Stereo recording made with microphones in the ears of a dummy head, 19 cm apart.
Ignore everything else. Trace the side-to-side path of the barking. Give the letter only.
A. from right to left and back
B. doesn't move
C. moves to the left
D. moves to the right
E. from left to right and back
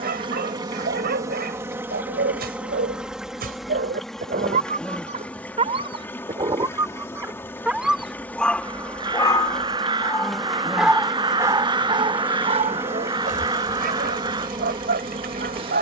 A.